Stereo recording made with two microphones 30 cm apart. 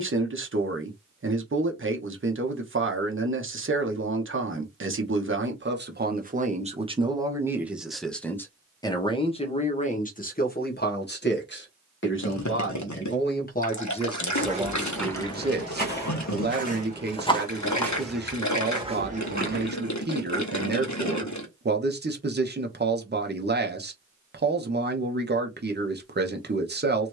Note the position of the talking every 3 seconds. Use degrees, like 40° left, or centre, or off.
40° right, 40° right, 10° right, 30° left, 20° left, 30° right, 30° right, 30° right, 30° right.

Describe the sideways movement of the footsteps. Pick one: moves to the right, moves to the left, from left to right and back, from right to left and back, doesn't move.
from right to left and back.